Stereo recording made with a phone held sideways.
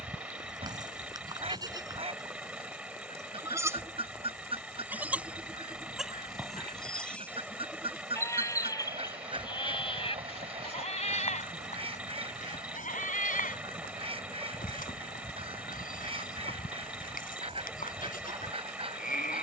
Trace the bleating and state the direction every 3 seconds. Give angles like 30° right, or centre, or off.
30° right, 10° right, 10° left, 40° left, 70° left, 70° left, 70° left.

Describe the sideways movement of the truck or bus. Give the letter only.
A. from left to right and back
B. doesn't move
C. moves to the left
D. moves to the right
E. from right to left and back
B.